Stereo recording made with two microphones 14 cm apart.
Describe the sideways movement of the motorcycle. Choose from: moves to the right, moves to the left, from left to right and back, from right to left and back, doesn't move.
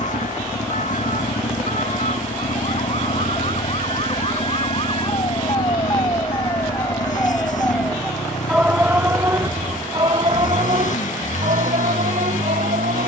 doesn't move.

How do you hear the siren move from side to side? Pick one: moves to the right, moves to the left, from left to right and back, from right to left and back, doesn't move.
moves to the right.